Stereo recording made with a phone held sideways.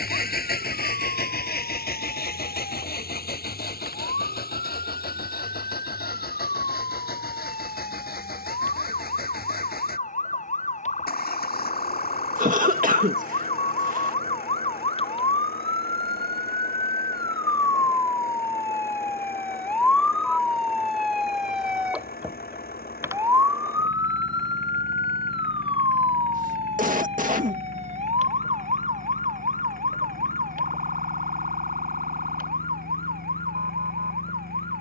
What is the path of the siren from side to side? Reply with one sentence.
You can hear the siren move from left to right.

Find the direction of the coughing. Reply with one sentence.
You can hear the coughing on the right.